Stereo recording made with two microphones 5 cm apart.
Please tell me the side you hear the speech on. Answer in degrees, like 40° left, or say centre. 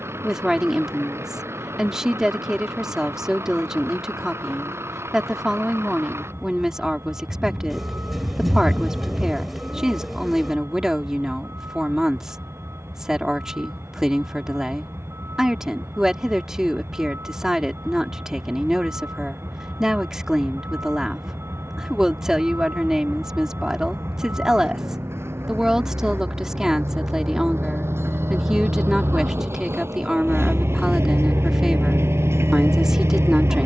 10° right.